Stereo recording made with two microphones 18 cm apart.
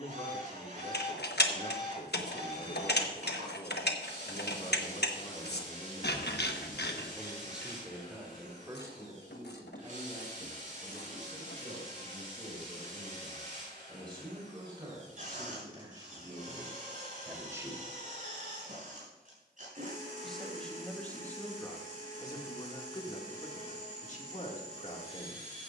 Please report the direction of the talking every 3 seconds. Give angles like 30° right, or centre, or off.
50° left, 40° left, 10° right, 30° right, 30° right, 20° right, centre, 20° left, 40° left.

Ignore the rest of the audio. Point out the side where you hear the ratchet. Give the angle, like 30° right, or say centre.
70° left.